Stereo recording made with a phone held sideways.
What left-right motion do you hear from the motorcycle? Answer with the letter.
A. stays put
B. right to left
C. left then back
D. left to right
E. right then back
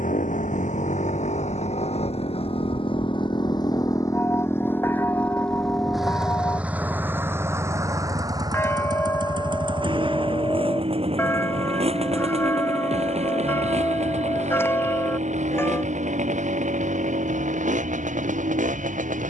D.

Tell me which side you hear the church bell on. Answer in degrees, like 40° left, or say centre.
20° left.